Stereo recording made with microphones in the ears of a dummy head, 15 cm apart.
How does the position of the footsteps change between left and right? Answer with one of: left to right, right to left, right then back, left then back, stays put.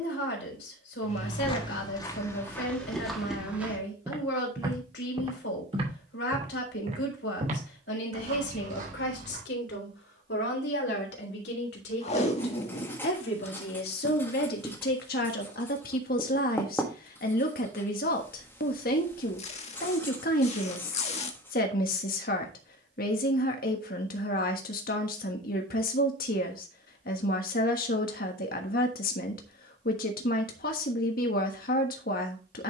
left to right.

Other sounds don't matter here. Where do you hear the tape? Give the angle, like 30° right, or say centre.
40° left.